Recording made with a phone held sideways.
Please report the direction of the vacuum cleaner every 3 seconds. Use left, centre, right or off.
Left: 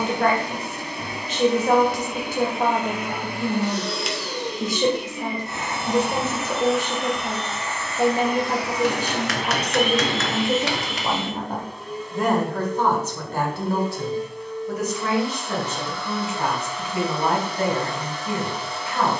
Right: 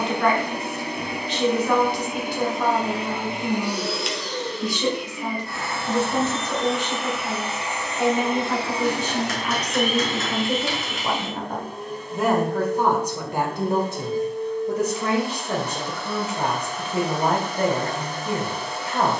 right, centre, centre, right, right, right, right.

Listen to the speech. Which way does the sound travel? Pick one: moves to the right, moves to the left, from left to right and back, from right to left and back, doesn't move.
moves to the right.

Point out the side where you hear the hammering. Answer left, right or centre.
left.